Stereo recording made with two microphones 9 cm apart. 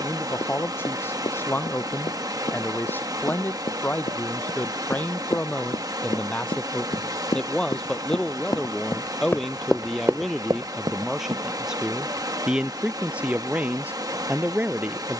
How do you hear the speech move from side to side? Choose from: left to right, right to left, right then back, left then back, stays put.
left to right.